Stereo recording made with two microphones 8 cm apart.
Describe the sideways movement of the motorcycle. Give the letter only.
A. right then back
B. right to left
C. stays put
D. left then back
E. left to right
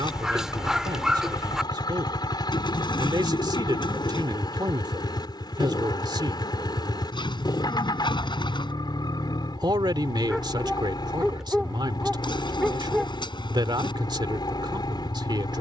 C.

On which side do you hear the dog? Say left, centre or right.
centre.